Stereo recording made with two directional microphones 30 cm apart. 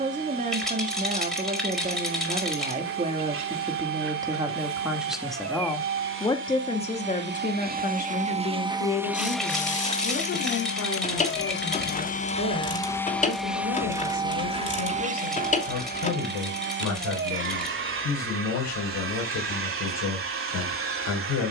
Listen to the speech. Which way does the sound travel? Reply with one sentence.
You can hear the speech move to the left.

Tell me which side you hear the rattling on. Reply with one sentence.
You can hear the rattling in the centre.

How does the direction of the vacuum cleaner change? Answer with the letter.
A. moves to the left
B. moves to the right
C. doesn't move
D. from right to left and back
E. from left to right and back
D.